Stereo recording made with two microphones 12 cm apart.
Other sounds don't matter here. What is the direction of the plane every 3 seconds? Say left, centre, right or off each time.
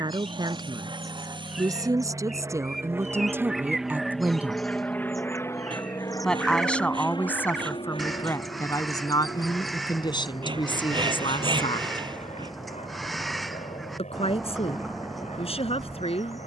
right, centre, left, left, left, left.